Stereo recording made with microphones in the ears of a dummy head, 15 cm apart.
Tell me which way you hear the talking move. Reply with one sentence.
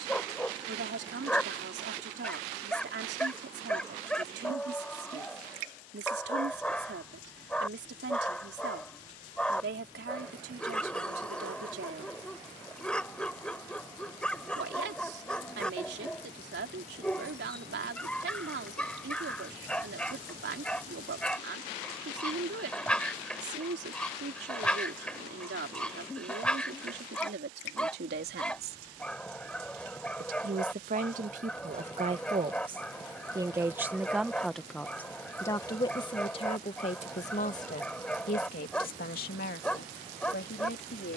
You can hear the talking go from the right side to the left.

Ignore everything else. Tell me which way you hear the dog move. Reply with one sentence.
In this clip you hear the dog stay put.